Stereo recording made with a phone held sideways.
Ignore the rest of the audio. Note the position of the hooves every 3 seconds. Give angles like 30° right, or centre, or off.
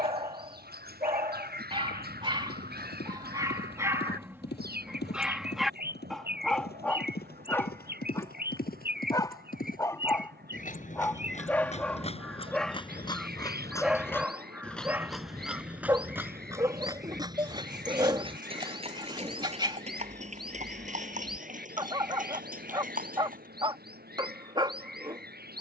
80° left, 80° left, 70° left, 50° left, 20° left, 10° right, 40° right, 50° right, off.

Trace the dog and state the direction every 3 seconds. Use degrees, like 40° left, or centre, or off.
30° right, 10° right, 10° left, 10° left, centre, 20° right, 30° right, 30° right, 30° right.